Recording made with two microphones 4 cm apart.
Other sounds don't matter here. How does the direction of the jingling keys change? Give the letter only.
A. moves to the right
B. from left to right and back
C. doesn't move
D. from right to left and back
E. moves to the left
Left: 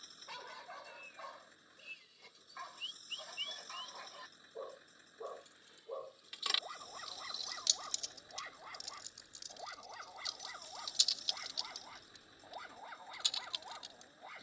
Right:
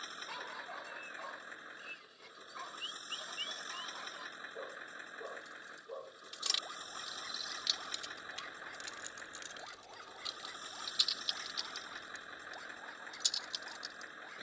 B.